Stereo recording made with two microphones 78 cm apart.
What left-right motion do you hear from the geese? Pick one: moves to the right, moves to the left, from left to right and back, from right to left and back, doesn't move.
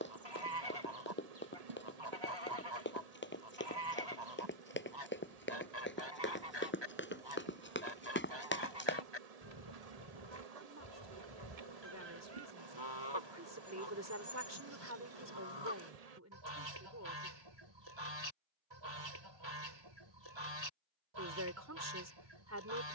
doesn't move.